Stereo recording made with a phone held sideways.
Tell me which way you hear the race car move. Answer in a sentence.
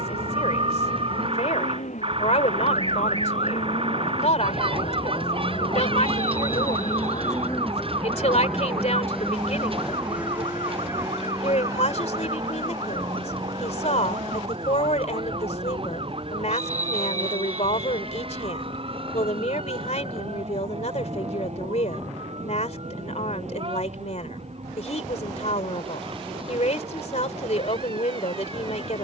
You can hear the race car move to the right.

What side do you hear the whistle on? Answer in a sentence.
You can hear the whistle on the right.